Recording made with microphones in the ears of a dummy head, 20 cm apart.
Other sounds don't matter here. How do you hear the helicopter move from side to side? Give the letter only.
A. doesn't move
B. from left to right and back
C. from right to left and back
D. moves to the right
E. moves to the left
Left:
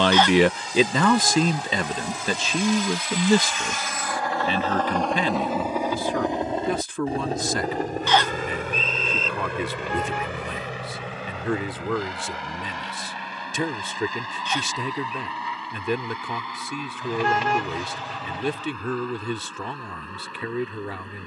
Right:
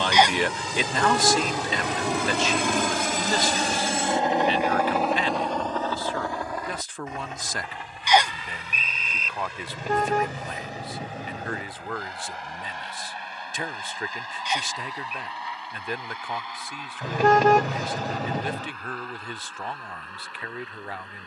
E.